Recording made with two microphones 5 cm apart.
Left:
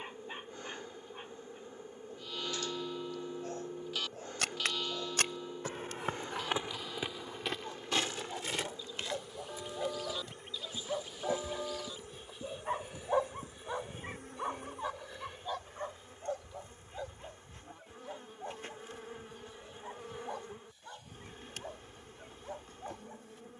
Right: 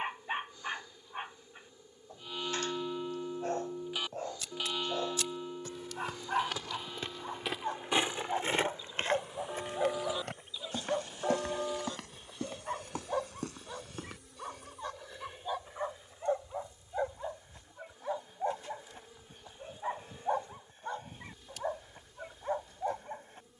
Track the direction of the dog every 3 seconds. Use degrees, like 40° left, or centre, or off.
40° right, 40° right, 40° right, 20° right, 10° left, 20° right, 40° right, 40° right.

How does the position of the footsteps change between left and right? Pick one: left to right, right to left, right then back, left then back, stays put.
left to right.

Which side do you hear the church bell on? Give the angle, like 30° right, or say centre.
20° right.